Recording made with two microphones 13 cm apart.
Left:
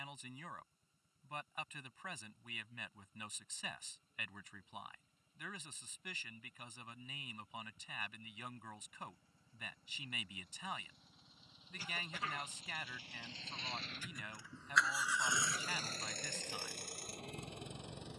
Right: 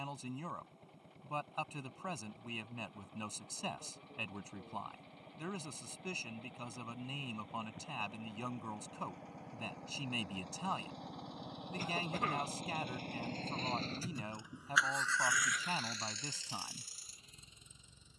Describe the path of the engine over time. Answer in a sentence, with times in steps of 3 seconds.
In this clip you hear the engine on the right from 0 s and on the left from 15 s.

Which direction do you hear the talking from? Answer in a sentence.
You can hear the talking on the right.